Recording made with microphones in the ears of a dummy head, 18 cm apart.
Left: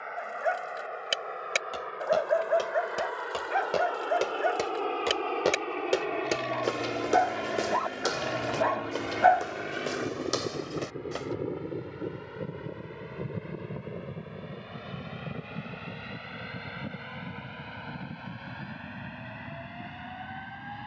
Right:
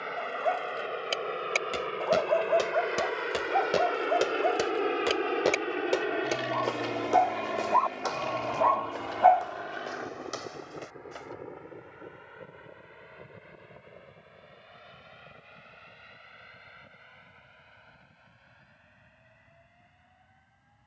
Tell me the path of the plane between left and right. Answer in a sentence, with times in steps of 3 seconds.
You can hear the plane on the right from 0 s, in the centre from 6 s and on the left from 9 s.